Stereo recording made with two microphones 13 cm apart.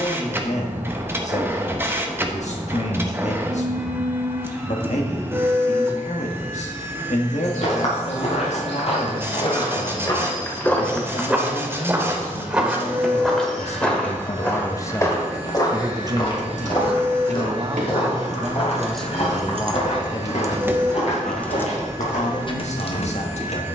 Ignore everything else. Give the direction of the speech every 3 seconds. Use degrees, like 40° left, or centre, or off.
60° left, 60° left, 60° left, 60° left, 50° left, 30° right, 20° left, 60° left.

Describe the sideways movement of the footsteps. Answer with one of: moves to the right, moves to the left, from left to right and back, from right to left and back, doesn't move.
from left to right and back.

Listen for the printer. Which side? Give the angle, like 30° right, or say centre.
20° right.